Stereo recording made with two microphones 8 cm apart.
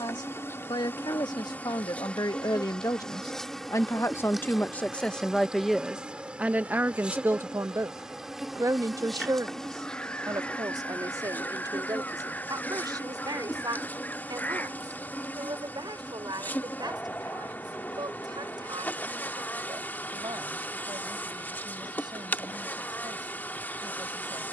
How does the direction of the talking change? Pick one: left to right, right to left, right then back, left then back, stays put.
left to right.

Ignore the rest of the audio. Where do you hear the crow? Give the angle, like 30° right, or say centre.
20° left.